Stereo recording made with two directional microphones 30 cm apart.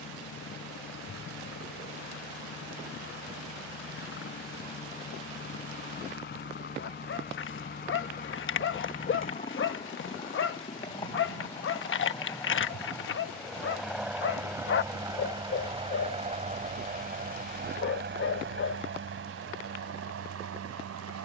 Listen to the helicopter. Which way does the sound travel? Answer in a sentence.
You can hear the helicopter move to the right.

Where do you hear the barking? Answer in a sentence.
You can hear the barking on the left.